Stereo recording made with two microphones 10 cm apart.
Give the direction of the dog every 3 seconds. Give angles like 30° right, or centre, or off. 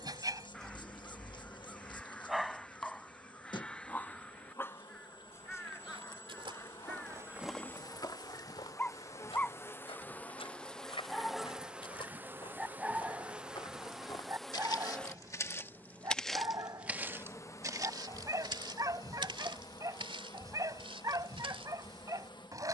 20° right, 20° left, 20° left, centre, 20° right, 40° right, 40° right, 40° right.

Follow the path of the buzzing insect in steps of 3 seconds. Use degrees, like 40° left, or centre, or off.
50° left, 50° left, 40° left, 10° left, 10° right, 20° left, 40° left, 50° left.